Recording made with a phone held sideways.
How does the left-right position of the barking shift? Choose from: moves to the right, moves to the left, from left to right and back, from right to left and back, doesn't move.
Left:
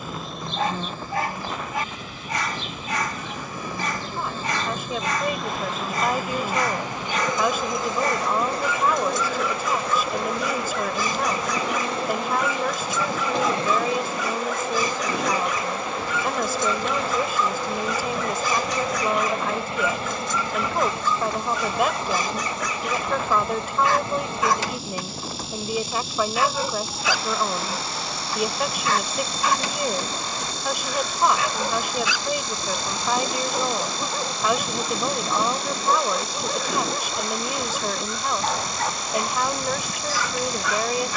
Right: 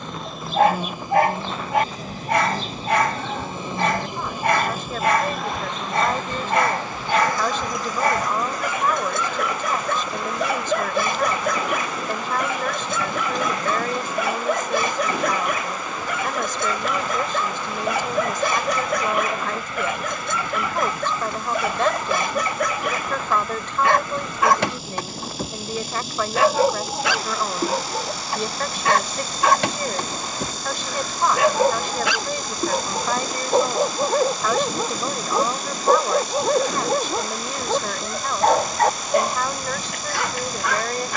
doesn't move.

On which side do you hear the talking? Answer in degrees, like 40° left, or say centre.
10° left.